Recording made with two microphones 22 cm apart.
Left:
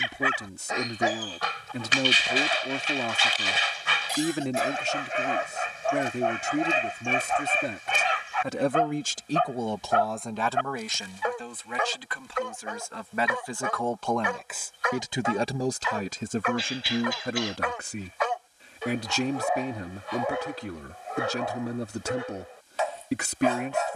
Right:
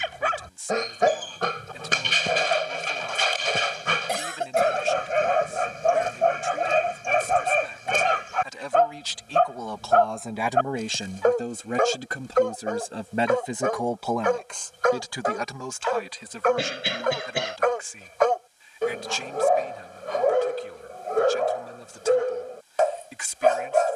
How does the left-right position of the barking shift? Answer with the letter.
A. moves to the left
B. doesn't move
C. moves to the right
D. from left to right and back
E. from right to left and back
B.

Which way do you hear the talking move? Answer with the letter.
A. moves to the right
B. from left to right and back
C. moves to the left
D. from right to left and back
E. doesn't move
B.